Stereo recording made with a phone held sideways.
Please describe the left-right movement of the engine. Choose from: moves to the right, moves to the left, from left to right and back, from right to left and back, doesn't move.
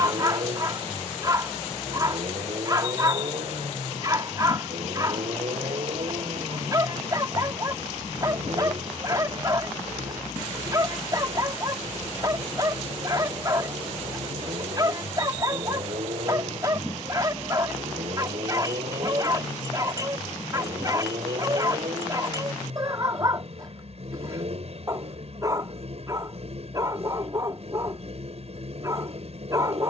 doesn't move.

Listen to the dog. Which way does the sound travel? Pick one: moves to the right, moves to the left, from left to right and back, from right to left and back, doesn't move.
doesn't move.